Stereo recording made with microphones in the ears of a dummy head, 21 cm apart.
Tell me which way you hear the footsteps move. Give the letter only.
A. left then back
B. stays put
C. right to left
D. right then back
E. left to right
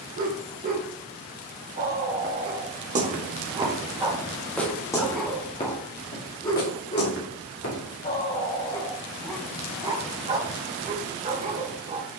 C.